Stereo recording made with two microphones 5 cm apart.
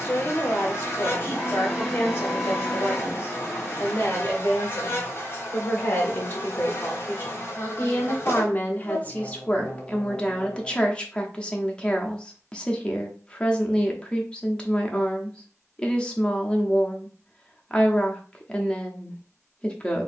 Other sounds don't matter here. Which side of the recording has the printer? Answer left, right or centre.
centre.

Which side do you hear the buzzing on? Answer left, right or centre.
left.